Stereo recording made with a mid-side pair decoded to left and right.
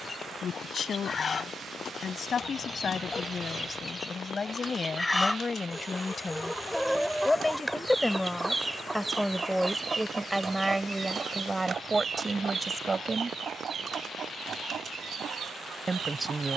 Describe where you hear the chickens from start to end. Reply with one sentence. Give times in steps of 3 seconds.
In this clip you hear the chickens on the left from 0 s, in the centre from 6 s and on the right from 9 s.